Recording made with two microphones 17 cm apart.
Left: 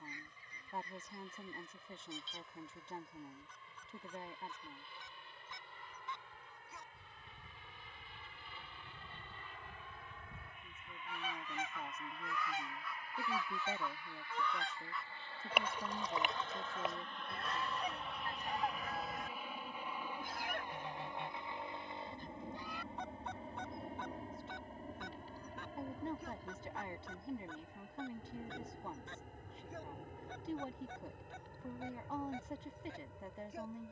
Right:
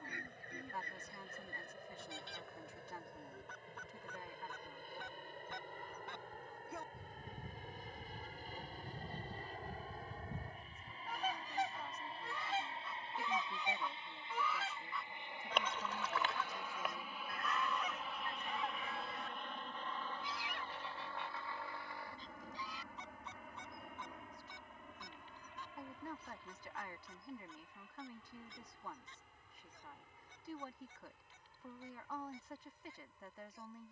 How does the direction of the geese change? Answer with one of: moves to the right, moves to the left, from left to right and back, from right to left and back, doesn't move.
moves to the left.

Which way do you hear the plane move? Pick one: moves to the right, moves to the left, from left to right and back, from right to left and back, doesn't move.
moves to the left.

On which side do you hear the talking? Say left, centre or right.
left.